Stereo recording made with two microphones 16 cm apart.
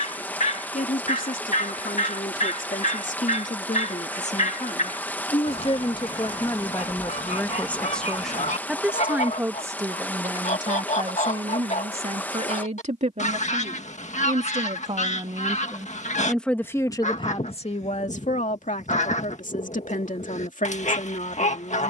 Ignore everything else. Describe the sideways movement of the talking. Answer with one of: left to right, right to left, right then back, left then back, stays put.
right then back.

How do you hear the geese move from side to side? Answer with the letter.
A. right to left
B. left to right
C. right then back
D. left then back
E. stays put
E.